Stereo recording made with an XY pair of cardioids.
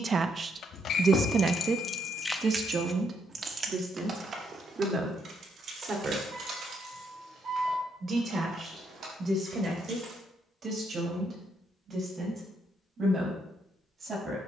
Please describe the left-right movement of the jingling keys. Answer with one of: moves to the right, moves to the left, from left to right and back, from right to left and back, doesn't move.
moves to the right.